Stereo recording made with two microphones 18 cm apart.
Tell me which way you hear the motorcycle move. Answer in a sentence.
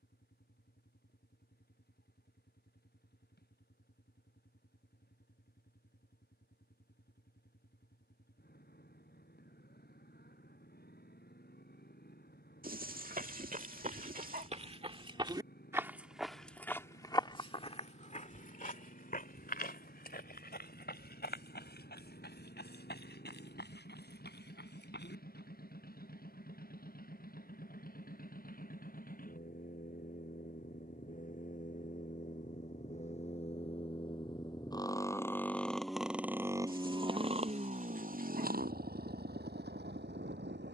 You can hear the motorcycle go from the left side to the right.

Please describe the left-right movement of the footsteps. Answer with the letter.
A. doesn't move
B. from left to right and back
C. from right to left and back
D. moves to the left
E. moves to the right
D.